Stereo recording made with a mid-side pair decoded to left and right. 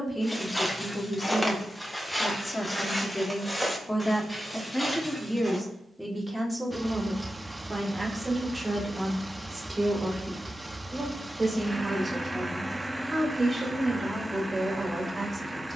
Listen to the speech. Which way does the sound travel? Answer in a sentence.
In this clip you hear the speech travel towards the right.